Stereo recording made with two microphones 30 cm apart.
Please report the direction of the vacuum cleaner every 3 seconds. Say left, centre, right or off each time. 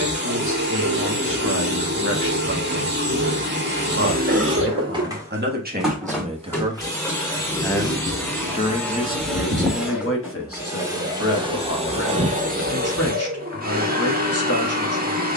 right, right, centre, centre, right.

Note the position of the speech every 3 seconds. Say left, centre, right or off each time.
right, right, centre, left, left.